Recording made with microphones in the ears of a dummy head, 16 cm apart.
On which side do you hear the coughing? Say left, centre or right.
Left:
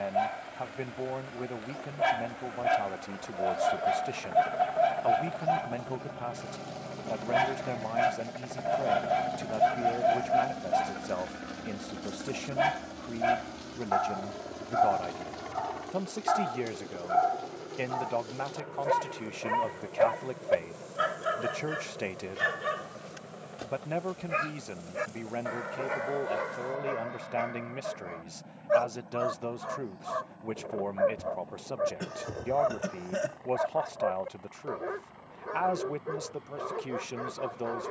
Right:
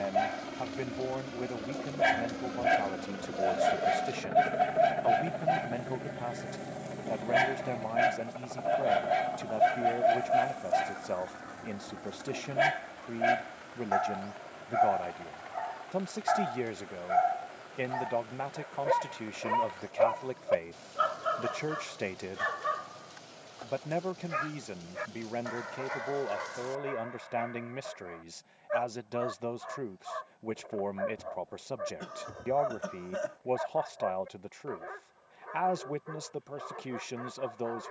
left.